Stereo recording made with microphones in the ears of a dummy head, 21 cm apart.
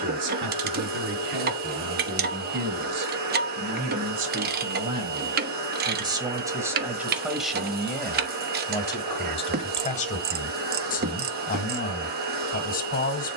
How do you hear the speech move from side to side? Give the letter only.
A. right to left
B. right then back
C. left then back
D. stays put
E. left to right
A.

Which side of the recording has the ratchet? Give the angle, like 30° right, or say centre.
40° right.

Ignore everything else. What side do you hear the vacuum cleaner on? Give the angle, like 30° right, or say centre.
40° right.